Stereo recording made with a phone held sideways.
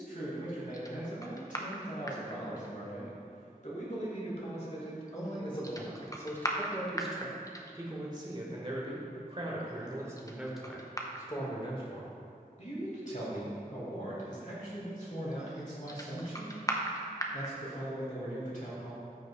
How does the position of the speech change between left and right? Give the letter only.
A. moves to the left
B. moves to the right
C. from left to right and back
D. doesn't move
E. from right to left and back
C.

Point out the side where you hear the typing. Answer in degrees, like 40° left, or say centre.
20° left.